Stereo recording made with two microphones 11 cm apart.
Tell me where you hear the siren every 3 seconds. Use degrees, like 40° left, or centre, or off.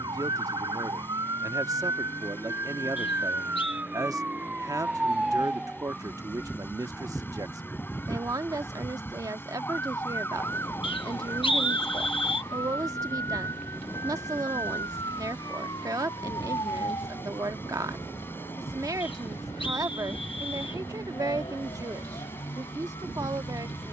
30° right, 10° right, 10° left, 20° left, 30° left, 40° left, 40° left, 50° left.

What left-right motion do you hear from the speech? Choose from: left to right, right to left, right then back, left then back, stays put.
stays put.